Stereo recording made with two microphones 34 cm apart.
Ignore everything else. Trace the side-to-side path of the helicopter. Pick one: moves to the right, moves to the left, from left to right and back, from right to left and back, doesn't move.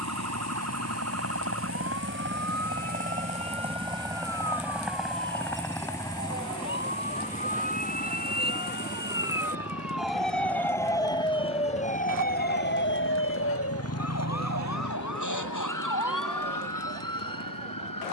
moves to the left.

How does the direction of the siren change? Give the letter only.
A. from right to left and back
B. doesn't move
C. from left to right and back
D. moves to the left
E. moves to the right
D.